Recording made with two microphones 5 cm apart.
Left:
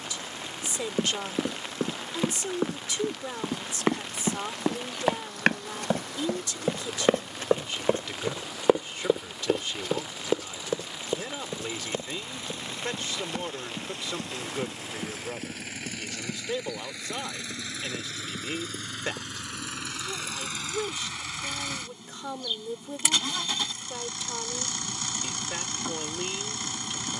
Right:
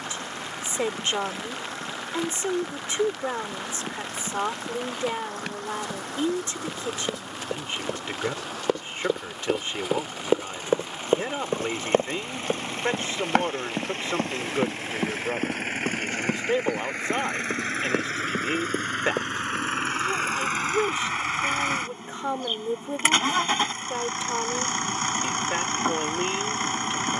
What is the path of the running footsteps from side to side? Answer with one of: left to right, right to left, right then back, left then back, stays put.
left to right.